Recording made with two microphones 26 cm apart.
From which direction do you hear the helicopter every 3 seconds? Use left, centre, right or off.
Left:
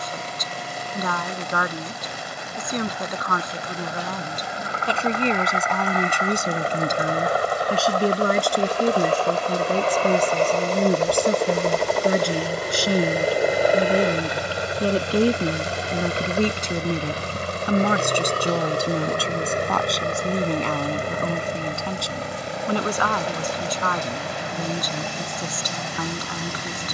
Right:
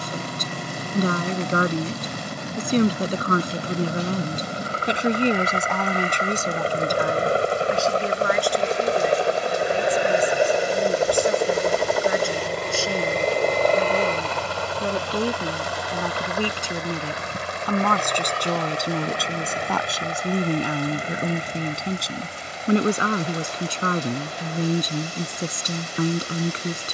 right, right, right, centre, centre, left, left, left, left.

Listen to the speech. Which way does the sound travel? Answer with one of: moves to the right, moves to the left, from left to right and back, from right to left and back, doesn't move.
from right to left and back.